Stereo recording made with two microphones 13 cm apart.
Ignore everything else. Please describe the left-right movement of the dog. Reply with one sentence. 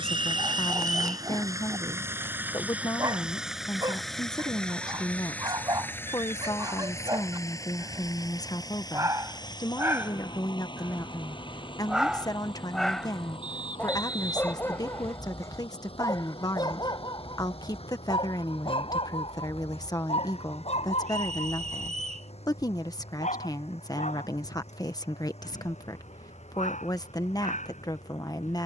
You can hear the dog travel towards the left.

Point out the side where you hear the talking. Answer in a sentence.
You can hear the talking on the left.